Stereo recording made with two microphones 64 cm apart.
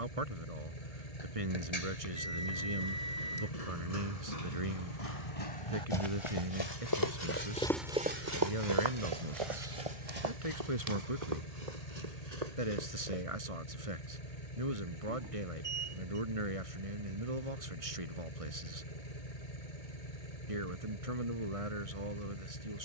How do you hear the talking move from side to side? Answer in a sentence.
You can hear the talking stay put.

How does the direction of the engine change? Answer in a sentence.
In this clip you hear the engine stay put.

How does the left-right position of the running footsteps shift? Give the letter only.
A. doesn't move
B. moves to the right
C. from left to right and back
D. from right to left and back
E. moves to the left
B.